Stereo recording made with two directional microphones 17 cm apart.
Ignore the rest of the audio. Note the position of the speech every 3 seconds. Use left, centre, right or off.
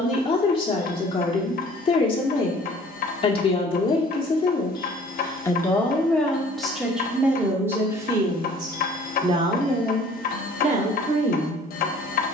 left, left, centre, right.